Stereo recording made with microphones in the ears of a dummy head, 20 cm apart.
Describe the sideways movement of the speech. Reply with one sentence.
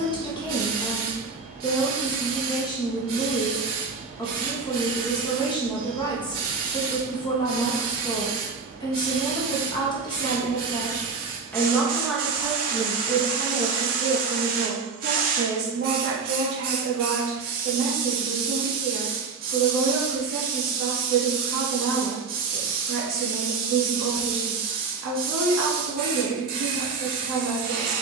You can hear the speech move from left to right.